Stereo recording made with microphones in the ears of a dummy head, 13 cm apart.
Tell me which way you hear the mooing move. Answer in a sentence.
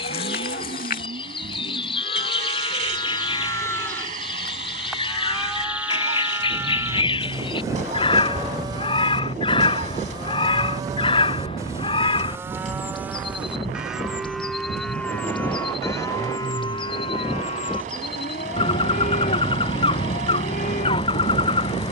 You can hear the mooing go right and come back.